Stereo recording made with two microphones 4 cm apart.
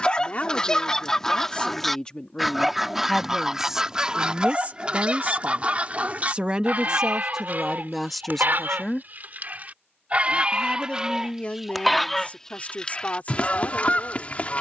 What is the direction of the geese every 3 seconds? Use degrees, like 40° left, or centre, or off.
10° left, 20° right, 40° right, 20° right, 30° left.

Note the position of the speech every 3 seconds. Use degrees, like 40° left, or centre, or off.
20° left, 20° right, 10° right, 30° left, 40° left.